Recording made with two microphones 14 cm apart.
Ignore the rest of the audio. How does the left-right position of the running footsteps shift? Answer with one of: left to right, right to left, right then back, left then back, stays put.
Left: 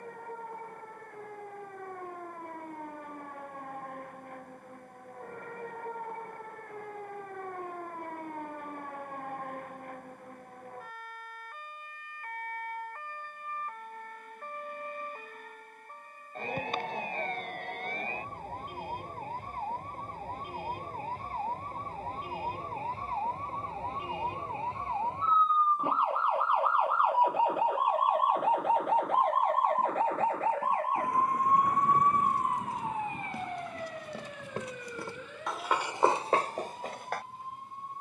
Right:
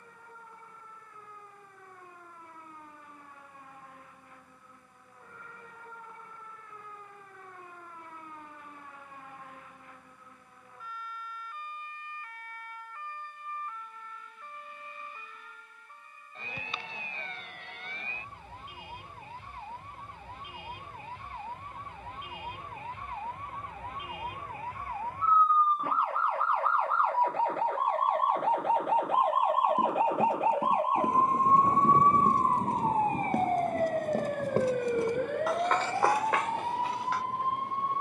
right to left.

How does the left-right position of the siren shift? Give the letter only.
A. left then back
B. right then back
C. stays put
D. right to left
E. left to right
E.